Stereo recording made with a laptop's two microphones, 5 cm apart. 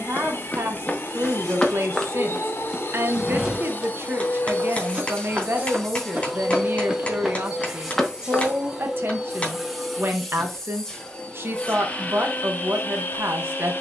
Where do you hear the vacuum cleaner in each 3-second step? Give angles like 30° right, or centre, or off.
60° left, 30° left, 10° right, 10° left, 40° left.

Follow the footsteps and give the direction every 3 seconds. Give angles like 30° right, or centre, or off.
20° left, 20° right, 10° right, off, off.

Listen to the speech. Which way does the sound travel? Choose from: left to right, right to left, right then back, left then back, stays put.
stays put.